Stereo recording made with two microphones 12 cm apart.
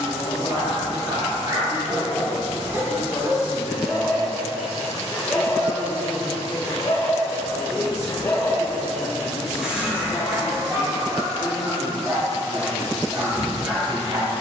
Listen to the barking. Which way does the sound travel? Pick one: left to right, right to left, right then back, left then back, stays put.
left then back.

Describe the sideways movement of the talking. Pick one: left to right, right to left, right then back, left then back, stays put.
stays put.